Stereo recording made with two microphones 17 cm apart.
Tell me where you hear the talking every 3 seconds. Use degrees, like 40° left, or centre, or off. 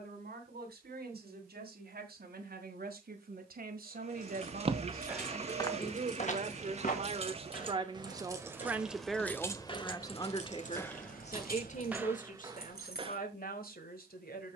70° right, 60° right, 30° right, 30° left, 60° left.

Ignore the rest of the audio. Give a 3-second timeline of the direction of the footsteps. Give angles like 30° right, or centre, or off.
off, centre, 50° left, 10° left, 20° right.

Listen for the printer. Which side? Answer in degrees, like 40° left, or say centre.
40° right.